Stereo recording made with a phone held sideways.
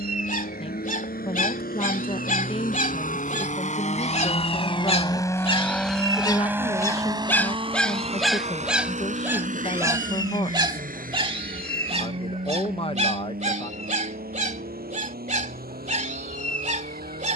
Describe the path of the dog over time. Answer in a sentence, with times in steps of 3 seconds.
You can hear the dog on the left from 0 s, in the centre from 6 s and on the right from 9 s.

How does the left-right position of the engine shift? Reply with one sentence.
In this clip you hear the engine move from left to right.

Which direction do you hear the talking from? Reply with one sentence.
In this clip you hear the talking on the left.